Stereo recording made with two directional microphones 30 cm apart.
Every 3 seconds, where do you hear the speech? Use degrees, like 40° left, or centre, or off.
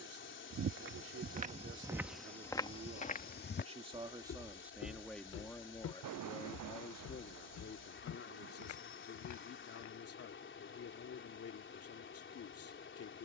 40° right, centre, 40° left, 50° left, 50° left.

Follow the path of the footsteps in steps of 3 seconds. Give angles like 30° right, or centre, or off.
10° right, 50° left, 70° left, 70° left, off.